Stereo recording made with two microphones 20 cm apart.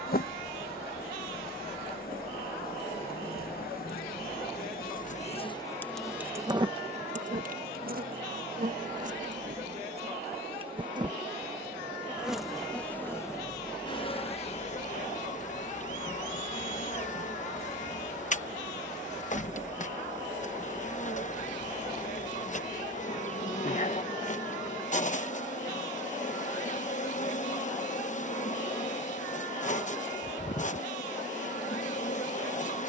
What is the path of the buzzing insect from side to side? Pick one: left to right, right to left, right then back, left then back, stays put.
right then back.